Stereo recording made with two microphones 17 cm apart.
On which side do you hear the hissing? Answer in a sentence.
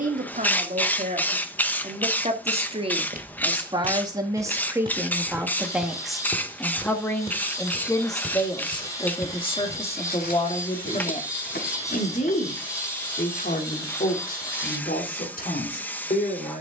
You can hear the hissing in the centre.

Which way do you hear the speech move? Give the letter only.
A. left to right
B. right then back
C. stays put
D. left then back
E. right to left
E.